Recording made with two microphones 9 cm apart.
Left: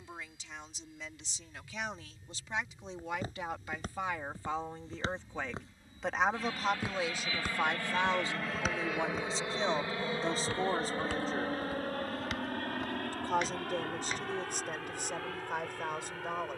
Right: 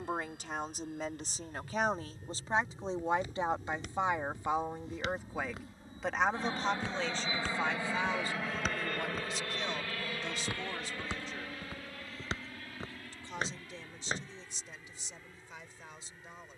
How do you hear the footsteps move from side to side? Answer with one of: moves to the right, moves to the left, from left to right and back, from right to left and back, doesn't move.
moves to the right.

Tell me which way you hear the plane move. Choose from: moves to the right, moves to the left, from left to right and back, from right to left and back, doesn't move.
moves to the left.